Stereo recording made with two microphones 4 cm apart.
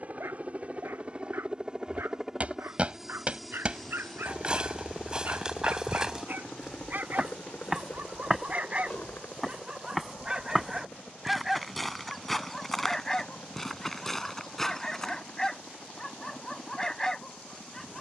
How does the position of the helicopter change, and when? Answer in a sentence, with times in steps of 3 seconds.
You can hear the helicopter on the right from 0 s, in the centre from 3 s and on the left from 6 s.